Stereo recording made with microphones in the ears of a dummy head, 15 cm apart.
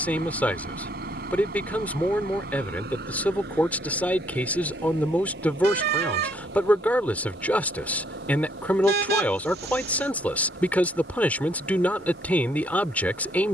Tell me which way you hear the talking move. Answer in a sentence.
In this clip you hear the talking stay in one place.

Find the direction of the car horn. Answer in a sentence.
In this clip you hear the car horn on the right.